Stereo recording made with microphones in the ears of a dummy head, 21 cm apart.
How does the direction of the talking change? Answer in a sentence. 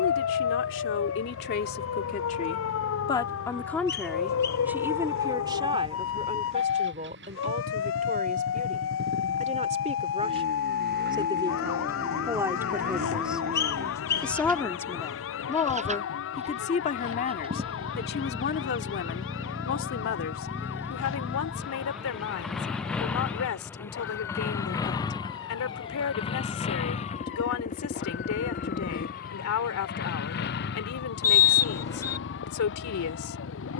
You can hear the talking move from left to right and back again.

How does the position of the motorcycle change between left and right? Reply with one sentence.
You can hear the motorcycle move to the left.